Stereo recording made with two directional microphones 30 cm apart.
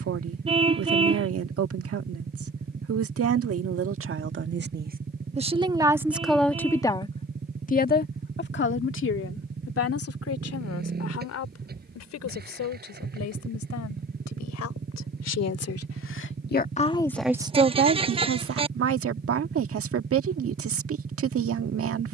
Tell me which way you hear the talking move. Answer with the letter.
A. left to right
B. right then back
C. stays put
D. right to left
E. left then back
E.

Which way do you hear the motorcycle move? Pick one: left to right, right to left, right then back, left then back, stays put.
stays put.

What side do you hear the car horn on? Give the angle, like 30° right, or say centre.
20° right.